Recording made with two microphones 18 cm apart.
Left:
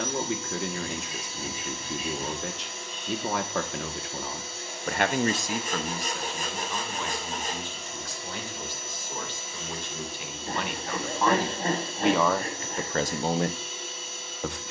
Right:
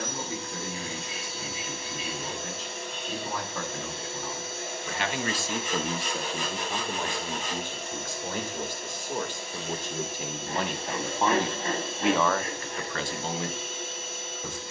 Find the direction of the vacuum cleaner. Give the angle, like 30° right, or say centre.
70° right.